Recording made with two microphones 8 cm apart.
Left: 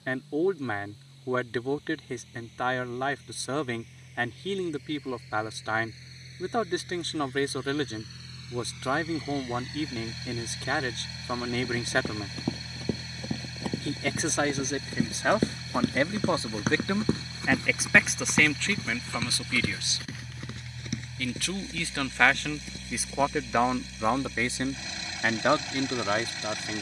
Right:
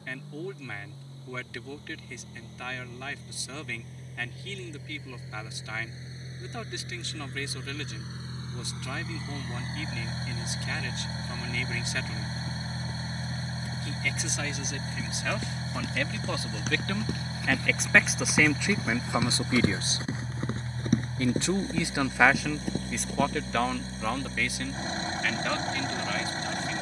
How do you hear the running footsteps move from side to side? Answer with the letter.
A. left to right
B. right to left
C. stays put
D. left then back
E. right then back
A.